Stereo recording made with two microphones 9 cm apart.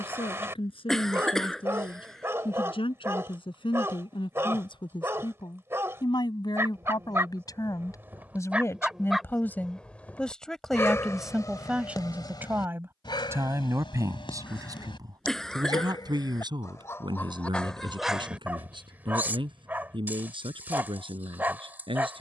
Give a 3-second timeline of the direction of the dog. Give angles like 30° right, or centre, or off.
30° right, 30° right, 20° right, 20° left, 60° left, 30° left, 20° right, 20° right.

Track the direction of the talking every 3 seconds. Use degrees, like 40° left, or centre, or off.
70° left, 60° left, 40° left, centre, 30° right, 50° right, 60° right, 70° right.